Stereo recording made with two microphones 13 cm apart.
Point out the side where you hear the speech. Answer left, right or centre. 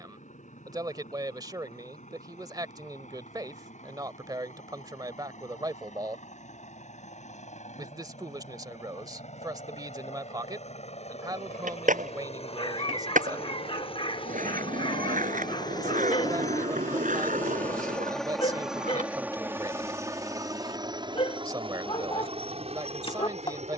right.